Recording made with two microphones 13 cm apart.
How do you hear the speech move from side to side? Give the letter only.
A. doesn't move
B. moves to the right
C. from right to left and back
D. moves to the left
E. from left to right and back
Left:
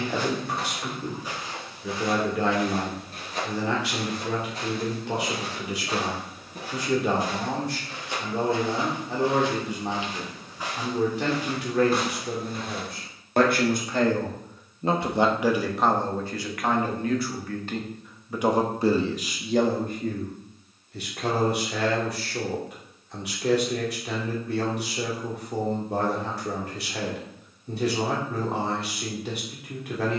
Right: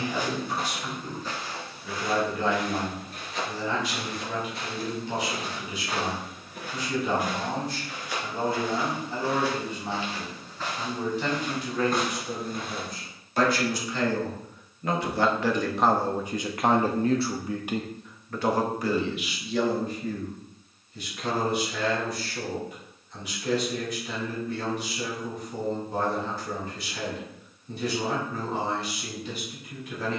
E.